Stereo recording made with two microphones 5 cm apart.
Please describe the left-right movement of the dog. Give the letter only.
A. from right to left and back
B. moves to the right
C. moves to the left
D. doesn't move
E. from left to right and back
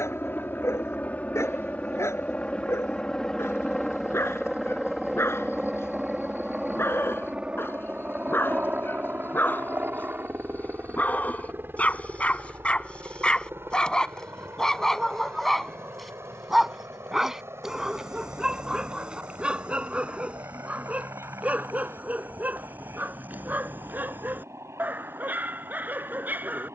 B.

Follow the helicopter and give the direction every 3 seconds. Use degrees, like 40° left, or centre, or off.
30° left, centre, 20° right, 40° right, 50° right, 60° right, 60° right, 70° right, 70° right.